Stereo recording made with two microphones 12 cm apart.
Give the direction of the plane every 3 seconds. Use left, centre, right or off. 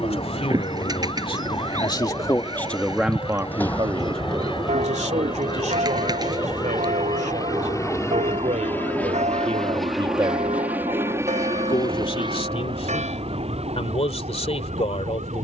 left, left, left, centre, right.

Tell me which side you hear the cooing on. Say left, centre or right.
right.